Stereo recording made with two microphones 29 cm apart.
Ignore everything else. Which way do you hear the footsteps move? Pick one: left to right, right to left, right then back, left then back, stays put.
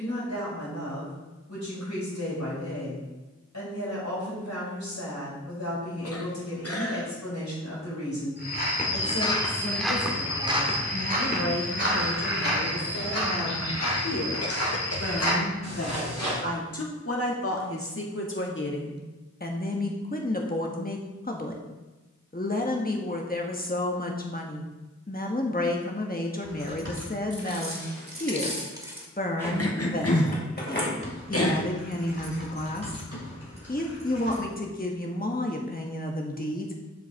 left to right.